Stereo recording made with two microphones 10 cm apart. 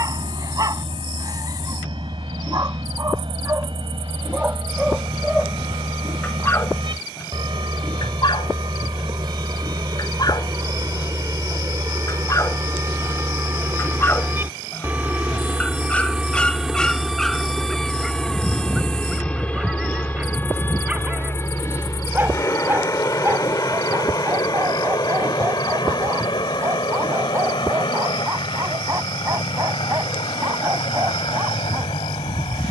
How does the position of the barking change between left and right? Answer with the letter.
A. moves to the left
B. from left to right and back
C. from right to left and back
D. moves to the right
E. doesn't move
C.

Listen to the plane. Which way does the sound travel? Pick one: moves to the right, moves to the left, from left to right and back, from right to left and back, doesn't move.
moves to the left.